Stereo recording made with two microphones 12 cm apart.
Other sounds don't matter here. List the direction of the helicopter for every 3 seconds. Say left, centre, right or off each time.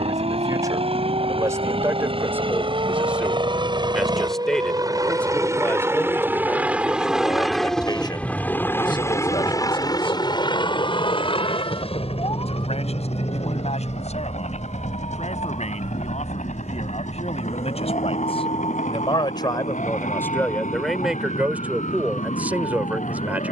right, right, centre, left, left, left, left, left.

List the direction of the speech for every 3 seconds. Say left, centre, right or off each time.
right, centre, left, left, left, left, left, centre.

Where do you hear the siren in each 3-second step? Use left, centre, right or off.
right, right, centre, left, left, left, left, left.